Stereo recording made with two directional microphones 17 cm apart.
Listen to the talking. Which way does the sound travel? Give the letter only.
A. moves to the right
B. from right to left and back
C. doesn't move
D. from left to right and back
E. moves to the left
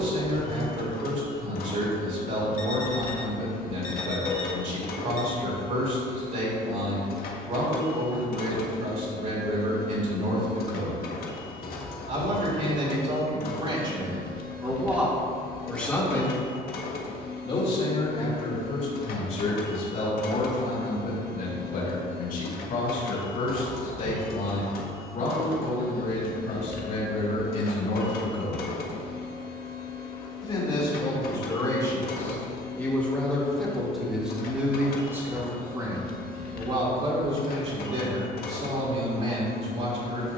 B.